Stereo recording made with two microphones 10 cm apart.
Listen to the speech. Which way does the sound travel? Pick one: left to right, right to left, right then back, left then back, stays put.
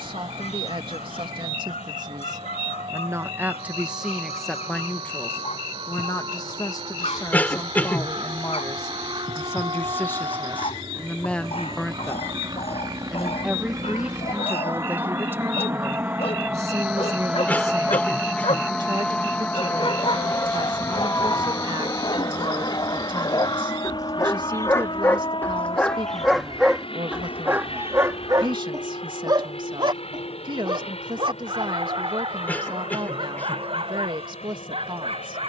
left then back.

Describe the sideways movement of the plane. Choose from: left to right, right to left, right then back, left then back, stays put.
right to left.